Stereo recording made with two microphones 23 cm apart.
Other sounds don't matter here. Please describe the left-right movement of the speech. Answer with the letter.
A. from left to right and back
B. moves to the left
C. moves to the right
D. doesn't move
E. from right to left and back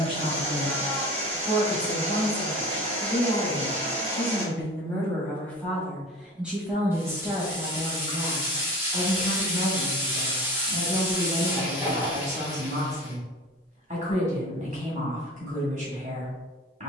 C.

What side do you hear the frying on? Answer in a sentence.
You can hear the frying in the centre.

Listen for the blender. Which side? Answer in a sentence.
In this clip you hear the blender on the right.